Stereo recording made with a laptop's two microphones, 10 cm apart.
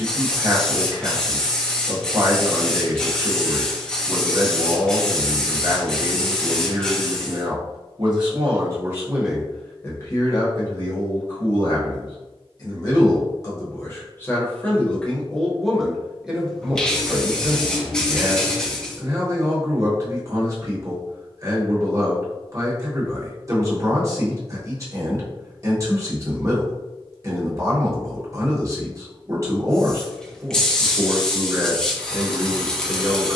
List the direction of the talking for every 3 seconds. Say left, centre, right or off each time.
right, right, right, left, left, centre, right, right, right, right, right.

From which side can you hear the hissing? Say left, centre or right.
centre.